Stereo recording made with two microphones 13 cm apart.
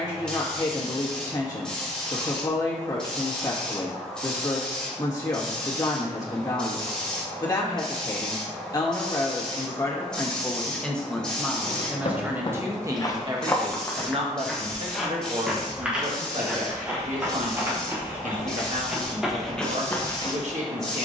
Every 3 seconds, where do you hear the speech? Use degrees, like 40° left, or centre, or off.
30° left, 30° left, 30° left, 10° left, 30° right, 60° right, 60° right.